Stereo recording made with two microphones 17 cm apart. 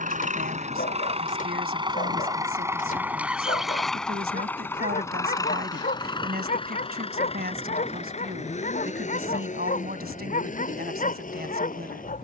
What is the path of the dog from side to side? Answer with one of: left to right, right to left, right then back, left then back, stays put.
stays put.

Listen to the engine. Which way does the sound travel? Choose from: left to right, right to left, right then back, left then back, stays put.
right to left.